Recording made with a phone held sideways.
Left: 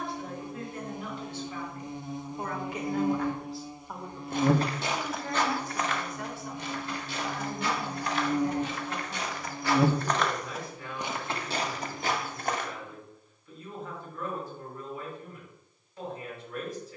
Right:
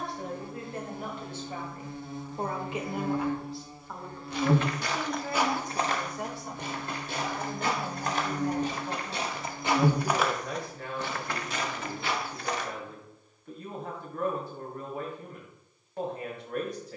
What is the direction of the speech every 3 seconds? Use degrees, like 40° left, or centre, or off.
50° right, centre, 50° right, 70° right, 70° right, 70° right.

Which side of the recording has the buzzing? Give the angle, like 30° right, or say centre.
20° left.